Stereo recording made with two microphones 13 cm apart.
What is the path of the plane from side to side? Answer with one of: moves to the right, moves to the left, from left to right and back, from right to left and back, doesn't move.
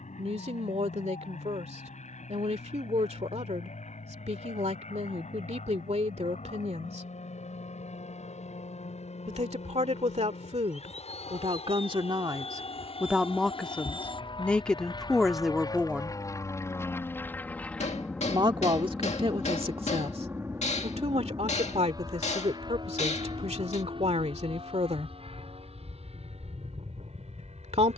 moves to the right.